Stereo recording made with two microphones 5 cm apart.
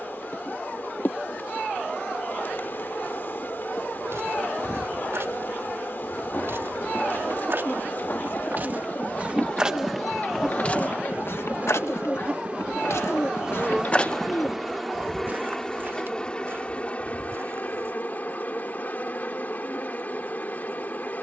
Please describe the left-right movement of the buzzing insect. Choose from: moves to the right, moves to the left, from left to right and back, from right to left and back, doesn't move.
from left to right and back.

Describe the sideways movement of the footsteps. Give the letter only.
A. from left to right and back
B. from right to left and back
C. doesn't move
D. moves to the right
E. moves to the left
B.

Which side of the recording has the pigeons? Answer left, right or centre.
left.